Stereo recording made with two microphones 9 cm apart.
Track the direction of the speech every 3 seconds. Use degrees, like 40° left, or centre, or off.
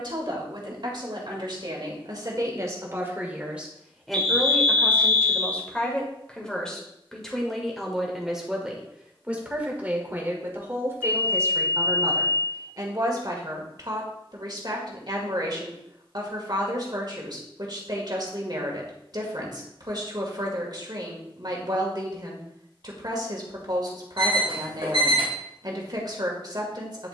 50° right, centre, centre, 20° right, 50° right, 50° right, 50° right, 50° right, 50° right.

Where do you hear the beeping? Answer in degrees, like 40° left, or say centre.
70° right.